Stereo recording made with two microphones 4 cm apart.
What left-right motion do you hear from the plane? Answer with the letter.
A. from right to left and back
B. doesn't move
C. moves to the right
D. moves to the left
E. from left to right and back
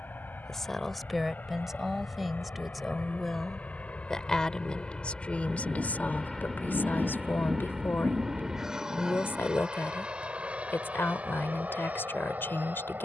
C.